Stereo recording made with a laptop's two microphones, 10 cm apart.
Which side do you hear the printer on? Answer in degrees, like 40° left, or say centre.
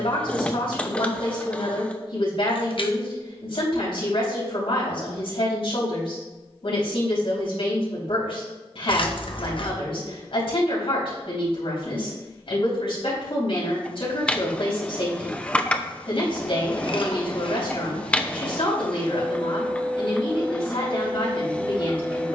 10° left.